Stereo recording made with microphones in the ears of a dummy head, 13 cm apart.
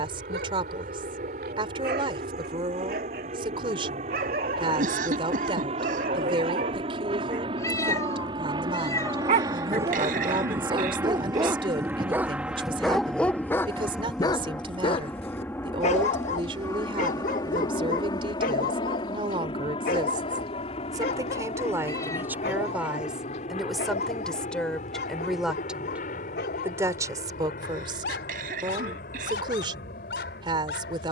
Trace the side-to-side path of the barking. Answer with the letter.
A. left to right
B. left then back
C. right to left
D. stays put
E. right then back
C.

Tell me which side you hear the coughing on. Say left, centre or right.
right.